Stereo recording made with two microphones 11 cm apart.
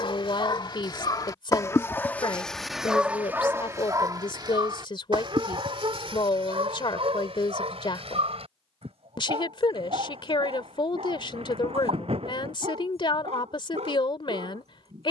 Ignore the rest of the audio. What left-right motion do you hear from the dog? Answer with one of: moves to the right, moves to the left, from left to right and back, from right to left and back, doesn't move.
moves to the right.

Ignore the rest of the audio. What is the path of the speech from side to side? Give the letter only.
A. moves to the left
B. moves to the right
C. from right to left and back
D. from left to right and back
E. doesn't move
E.